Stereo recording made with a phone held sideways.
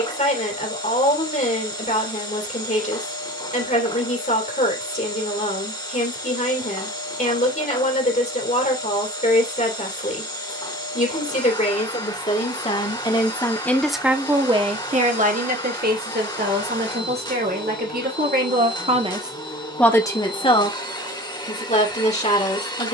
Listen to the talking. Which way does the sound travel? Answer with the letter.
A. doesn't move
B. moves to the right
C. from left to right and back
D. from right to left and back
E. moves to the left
C.